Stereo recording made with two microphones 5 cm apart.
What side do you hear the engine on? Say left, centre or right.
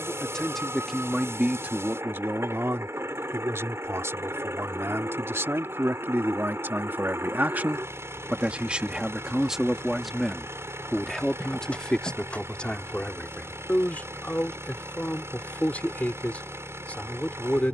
right.